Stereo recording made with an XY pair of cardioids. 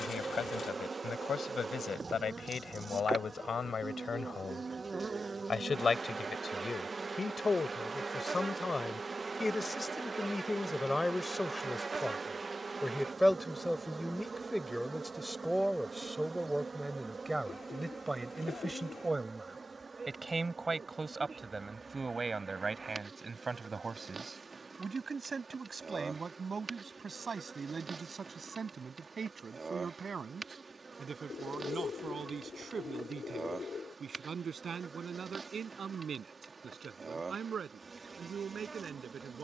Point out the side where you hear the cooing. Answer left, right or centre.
left.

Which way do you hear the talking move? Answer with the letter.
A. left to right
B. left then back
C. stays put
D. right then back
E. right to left
A.